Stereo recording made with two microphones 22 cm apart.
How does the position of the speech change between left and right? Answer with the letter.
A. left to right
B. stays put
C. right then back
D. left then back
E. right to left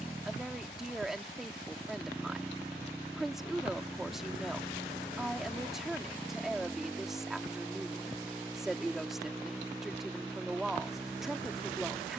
B.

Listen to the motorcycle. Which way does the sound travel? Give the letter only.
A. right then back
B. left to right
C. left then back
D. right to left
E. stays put
E.